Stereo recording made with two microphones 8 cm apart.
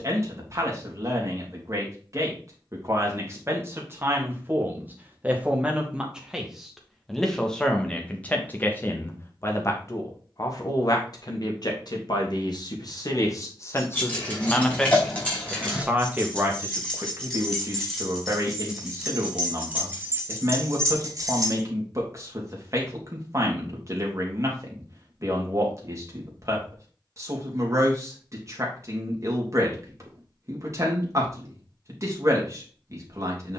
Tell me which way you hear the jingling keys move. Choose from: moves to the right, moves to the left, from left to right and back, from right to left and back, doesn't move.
moves to the right.